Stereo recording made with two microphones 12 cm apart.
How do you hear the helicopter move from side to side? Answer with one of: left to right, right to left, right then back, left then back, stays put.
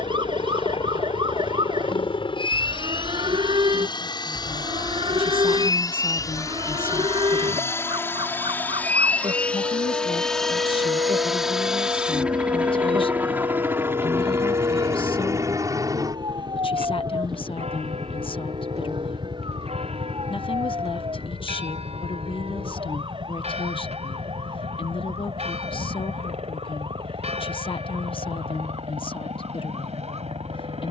left to right.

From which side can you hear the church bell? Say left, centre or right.
right.